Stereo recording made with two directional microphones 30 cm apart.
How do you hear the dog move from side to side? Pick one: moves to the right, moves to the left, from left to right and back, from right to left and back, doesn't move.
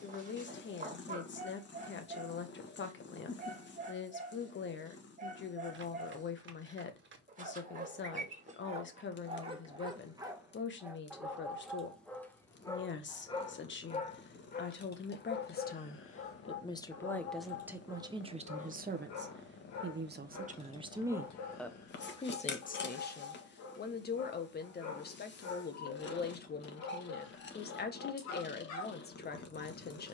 moves to the left.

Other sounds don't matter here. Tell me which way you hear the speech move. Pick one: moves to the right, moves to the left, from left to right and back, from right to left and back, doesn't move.
from left to right and back.